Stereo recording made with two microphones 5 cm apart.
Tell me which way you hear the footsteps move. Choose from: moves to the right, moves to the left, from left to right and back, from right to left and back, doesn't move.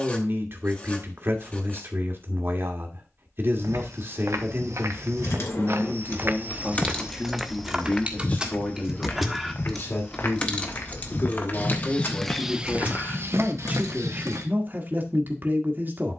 from right to left and back.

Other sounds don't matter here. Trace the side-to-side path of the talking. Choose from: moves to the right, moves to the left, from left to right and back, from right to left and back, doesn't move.
from right to left and back.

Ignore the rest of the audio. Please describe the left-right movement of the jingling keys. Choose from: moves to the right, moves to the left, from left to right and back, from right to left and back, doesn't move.
from left to right and back.